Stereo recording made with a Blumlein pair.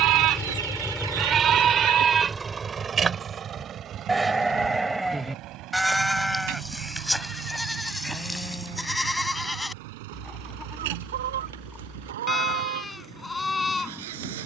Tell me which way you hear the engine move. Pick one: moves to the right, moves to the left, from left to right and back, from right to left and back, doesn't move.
moves to the right.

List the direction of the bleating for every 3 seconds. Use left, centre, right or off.
right, centre, centre, centre, centre.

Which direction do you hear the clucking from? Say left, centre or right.
right.